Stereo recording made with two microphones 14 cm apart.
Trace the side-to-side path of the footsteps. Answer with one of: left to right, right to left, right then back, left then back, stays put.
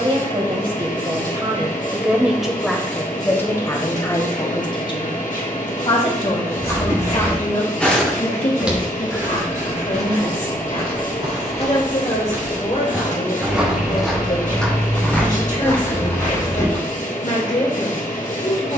right then back.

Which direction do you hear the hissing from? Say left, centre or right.
left.